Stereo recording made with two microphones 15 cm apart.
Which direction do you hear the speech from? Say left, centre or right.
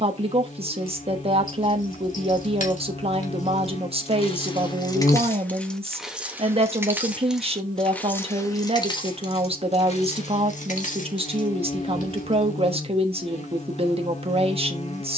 right.